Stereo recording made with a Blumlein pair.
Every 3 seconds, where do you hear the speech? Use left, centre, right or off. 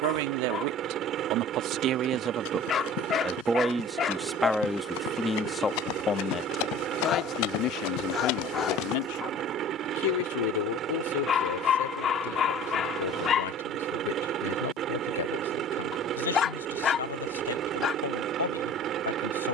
right, centre, left, left, left, left, left.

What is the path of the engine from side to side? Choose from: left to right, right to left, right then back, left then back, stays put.
stays put.